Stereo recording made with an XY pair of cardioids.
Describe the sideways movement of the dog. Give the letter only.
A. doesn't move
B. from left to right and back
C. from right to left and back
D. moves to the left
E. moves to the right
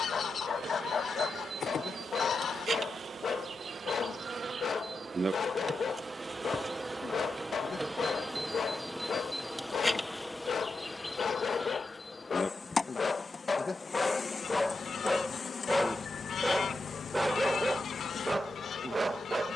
E.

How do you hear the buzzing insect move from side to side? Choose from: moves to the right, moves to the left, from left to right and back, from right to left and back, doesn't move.
moves to the left.